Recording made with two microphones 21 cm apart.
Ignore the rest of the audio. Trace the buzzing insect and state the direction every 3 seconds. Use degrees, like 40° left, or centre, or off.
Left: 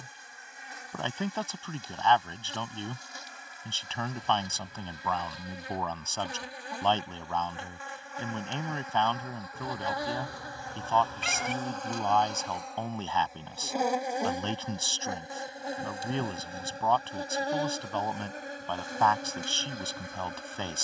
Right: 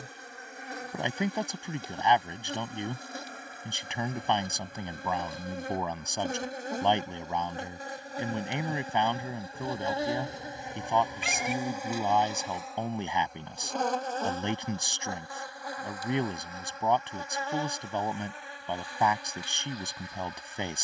60° right, 50° right, 40° right, 20° right, 10° left, 30° left, 50° left.